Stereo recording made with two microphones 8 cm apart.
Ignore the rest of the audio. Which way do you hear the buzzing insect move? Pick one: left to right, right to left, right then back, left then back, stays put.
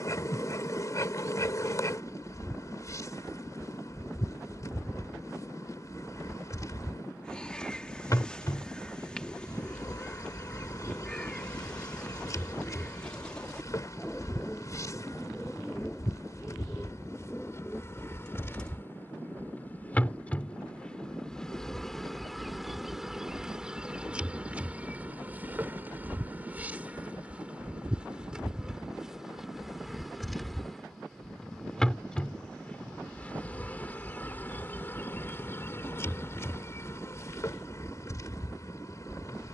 right then back.